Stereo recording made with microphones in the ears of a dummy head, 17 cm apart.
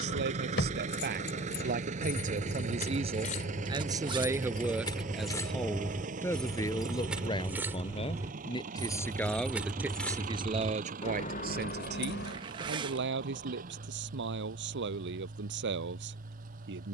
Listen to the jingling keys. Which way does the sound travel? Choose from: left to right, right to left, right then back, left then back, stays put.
right then back.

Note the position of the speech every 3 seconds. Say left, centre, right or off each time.
right, centre, left, right, right, right.